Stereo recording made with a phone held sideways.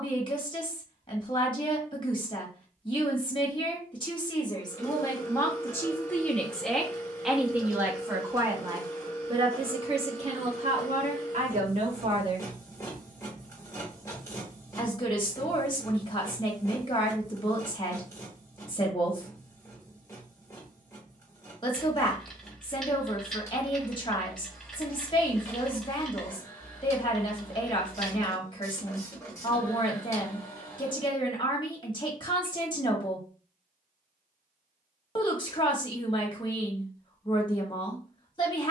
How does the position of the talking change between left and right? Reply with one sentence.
In this clip you hear the talking go right and come back.